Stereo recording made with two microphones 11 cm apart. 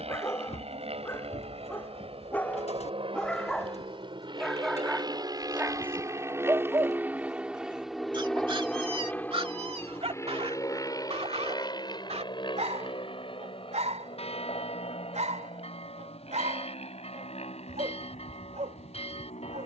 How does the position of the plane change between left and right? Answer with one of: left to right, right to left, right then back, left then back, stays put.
right to left.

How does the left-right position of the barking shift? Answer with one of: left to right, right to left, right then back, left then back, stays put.
left to right.